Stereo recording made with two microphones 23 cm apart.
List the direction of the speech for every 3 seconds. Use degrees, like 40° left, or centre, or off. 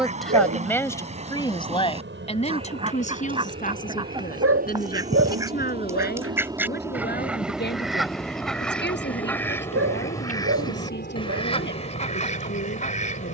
20° left, 40° left, 40° left, 50° left, 50° left.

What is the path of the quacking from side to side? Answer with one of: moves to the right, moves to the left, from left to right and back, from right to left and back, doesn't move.
moves to the left.